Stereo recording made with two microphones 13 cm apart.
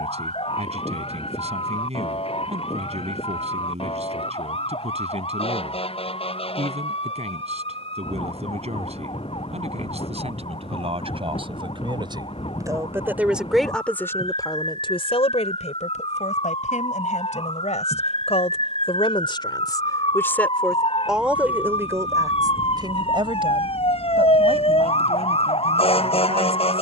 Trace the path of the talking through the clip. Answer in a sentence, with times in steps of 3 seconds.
You can hear the talking on the right from 0 s, in the centre from 12 s, on the left from 15 s and on the right from 21 s.